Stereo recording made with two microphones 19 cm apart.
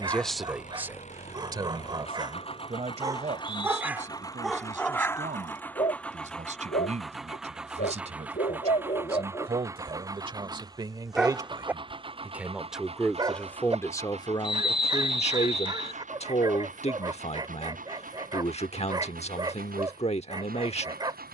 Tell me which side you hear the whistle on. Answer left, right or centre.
left.